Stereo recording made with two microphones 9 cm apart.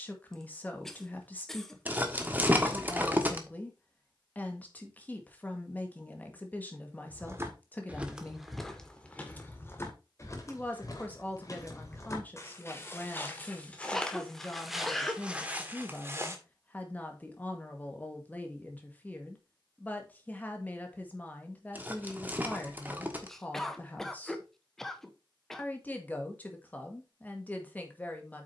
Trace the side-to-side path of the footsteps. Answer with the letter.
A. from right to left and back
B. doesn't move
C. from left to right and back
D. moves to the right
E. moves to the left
A.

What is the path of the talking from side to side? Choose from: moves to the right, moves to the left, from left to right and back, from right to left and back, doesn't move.
doesn't move.